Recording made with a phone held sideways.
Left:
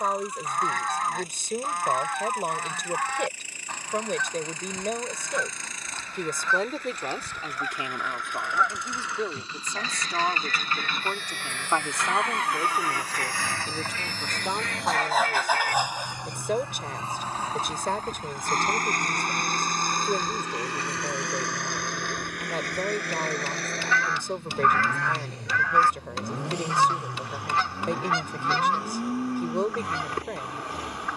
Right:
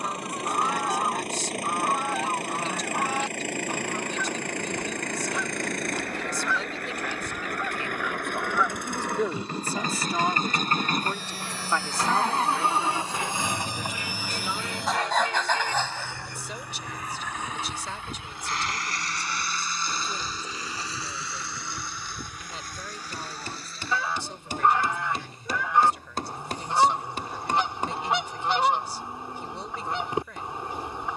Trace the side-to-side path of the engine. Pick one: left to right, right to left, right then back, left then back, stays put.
right to left.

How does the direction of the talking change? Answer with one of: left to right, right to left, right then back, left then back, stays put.
right then back.